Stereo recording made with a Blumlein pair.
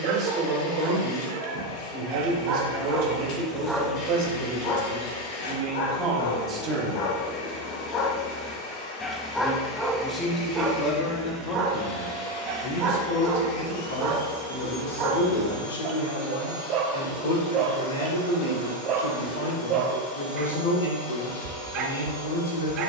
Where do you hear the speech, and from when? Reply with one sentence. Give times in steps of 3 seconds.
You can hear the speech on the right from 0 s and on the left from 9 s.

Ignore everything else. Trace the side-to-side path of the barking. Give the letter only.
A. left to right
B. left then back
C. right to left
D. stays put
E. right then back
B.